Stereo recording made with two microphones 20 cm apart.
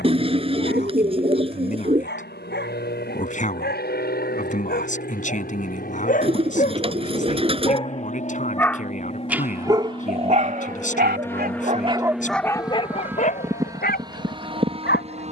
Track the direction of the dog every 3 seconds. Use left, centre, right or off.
left, left, left, right, left.